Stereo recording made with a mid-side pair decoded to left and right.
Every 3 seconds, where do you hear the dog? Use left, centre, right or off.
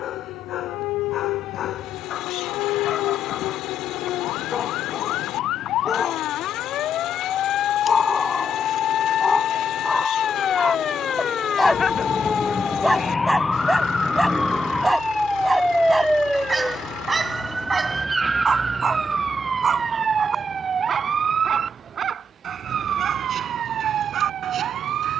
left, left, left, centre, centre, right, right, right, right.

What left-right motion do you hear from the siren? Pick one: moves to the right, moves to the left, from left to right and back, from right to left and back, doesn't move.
moves to the right.